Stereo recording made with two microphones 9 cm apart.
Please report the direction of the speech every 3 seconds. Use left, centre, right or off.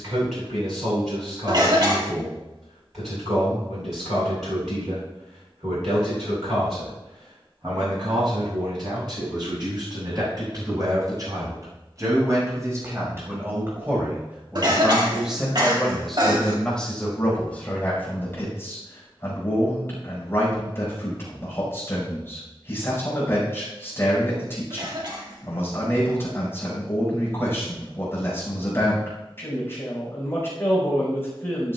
right, right, right, right, right, centre, left, left, left, left, left.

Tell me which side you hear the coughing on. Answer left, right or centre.
right.